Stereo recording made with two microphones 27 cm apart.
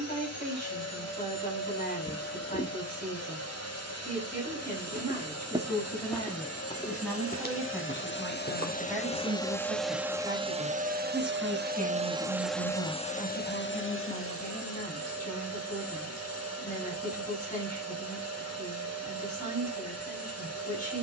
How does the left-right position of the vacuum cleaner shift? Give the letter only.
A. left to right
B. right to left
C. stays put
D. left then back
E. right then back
E.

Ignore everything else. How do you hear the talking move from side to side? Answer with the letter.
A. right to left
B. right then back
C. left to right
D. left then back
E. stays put
B.